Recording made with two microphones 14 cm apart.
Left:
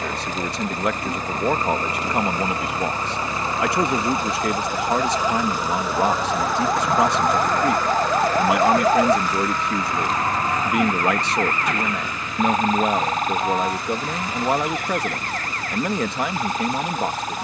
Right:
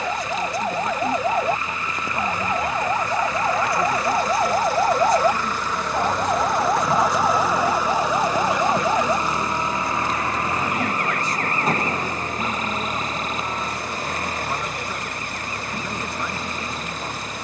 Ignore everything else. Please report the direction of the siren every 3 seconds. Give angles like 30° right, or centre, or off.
60° right, 40° right, centre, 30° left, 50° left, 60° left.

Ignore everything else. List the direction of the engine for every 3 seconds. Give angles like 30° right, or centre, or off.
40° left, 20° left, 10° right, 30° right, 50° right, 50° right.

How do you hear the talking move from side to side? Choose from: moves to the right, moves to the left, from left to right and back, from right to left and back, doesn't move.
doesn't move.